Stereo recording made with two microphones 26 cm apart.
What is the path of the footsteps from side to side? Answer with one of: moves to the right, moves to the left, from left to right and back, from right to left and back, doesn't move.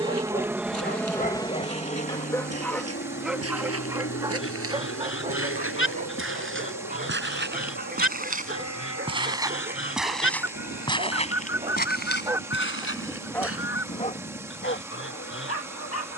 moves to the left.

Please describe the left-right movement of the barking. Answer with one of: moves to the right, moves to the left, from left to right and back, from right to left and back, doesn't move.
from left to right and back.